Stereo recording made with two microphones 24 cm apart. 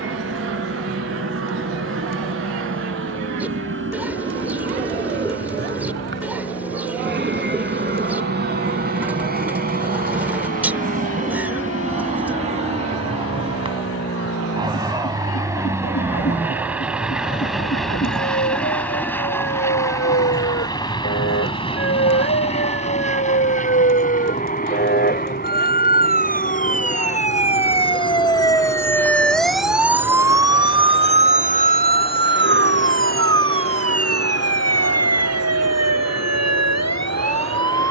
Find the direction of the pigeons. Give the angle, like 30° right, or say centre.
10° right.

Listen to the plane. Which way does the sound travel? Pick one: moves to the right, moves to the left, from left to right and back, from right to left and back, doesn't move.
moves to the left.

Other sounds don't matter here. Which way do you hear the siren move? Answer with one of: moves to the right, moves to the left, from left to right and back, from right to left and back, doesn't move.
moves to the right.